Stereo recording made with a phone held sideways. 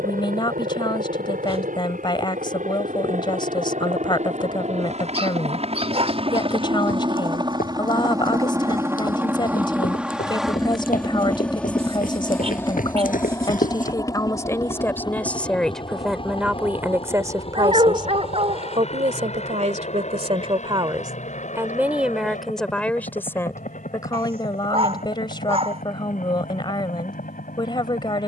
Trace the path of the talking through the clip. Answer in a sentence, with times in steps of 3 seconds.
In this clip you hear the talking on the left from 0 s, in the centre from 15 s, on the right from 18 s, in the centre from 21 s and on the left from 24 s.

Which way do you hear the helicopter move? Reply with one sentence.
In this clip you hear the helicopter move to the left.